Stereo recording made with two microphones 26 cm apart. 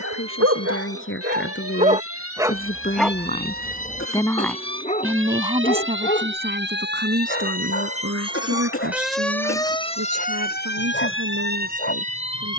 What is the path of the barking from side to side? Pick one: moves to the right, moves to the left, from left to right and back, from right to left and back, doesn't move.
moves to the left.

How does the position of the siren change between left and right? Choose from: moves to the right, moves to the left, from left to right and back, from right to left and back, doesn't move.
moves to the left.